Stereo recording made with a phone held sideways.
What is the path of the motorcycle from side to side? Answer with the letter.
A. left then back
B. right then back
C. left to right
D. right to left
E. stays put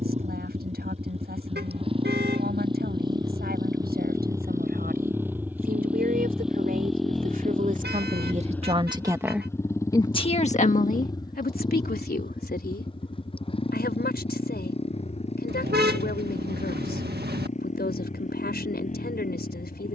D.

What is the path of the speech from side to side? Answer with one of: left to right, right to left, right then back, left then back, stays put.
right to left.